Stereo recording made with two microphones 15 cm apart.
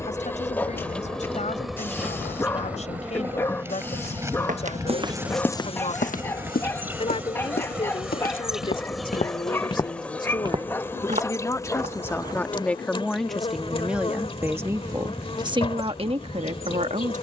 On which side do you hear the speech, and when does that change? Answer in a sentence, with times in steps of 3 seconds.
In this clip you hear the speech on the left from 0 s, in the centre from 12 s and on the right from 15 s.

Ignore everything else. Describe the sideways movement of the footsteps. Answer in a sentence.
In this clip you hear the footsteps move from right to left and back again.